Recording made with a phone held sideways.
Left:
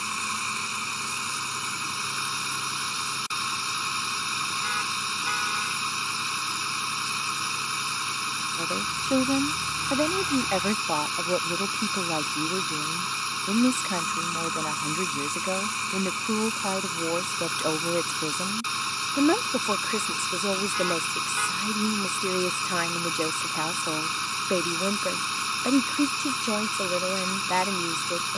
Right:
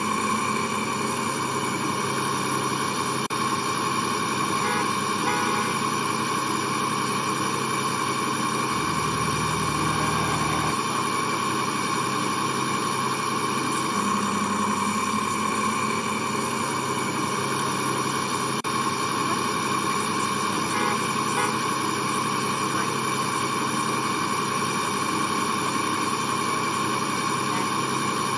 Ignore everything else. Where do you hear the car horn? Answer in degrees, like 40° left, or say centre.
60° right.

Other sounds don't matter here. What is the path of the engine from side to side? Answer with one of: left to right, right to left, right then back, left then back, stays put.
stays put.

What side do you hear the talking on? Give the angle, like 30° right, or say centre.
80° left.